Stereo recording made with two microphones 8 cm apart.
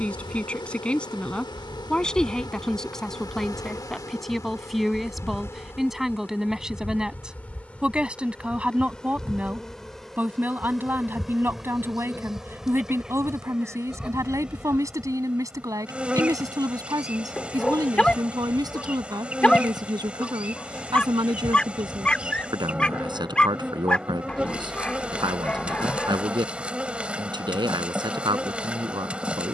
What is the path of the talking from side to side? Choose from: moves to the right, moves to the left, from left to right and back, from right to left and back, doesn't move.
moves to the right.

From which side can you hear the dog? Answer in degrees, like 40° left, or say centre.
10° left.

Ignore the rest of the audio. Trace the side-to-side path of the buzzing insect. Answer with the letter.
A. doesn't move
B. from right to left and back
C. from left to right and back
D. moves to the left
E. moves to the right
E.